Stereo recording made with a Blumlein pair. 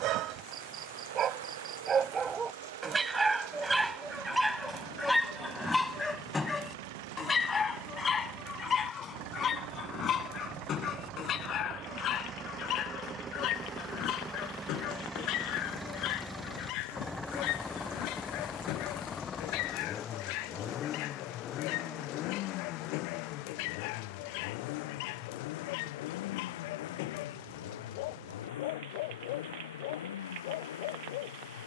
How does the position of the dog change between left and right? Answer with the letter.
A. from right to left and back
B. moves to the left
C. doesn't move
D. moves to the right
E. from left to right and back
B.